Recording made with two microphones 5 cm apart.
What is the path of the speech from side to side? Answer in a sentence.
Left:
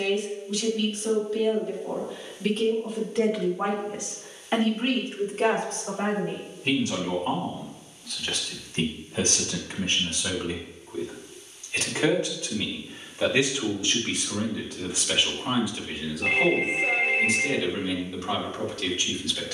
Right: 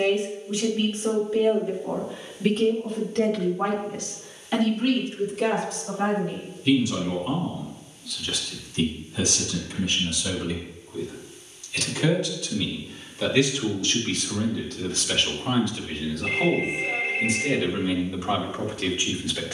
In this clip you hear the speech move from right to left and back again.